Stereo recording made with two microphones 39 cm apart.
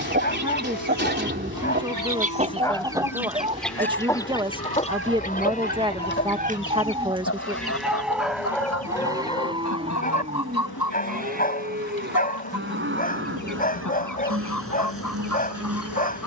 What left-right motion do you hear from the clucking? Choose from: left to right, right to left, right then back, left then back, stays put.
right to left.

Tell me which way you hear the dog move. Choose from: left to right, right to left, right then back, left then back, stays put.
right then back.